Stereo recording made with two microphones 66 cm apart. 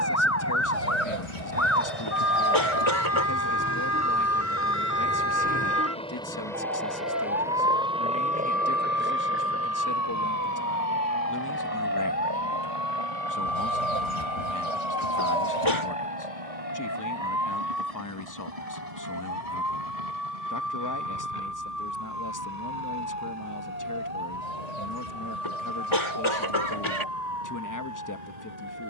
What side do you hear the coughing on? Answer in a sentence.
You can hear the coughing on the left.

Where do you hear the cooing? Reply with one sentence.
You can hear the cooing on the left.